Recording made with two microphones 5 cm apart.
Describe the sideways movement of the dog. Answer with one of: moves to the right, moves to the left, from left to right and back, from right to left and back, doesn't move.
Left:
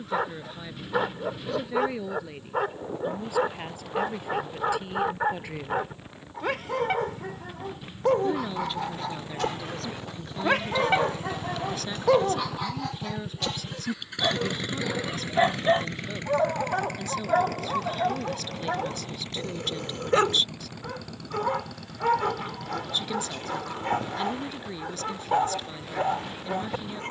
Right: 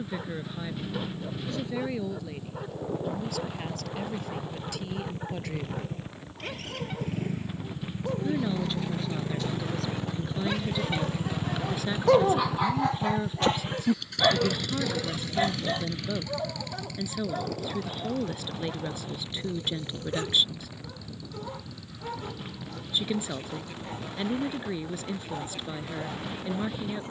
from left to right and back.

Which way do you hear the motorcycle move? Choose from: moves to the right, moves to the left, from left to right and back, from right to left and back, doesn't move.
moves to the left.